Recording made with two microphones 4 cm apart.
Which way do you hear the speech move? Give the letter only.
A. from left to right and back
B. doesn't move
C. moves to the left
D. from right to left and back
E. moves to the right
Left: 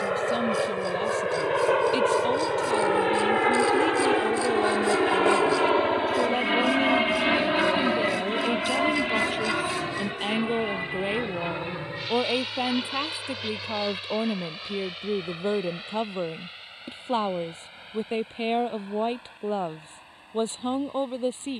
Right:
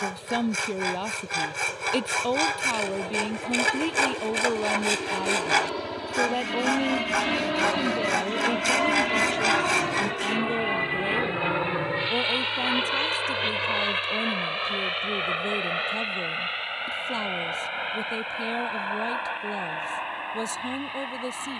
C.